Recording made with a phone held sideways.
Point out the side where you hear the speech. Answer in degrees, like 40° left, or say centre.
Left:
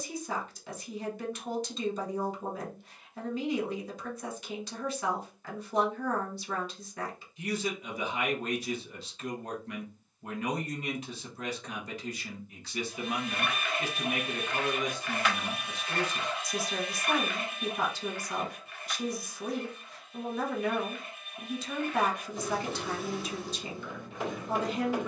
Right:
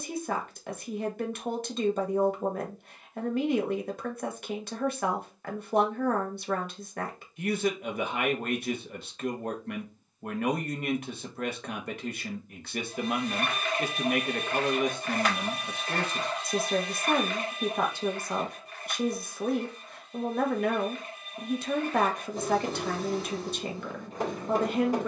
60° right.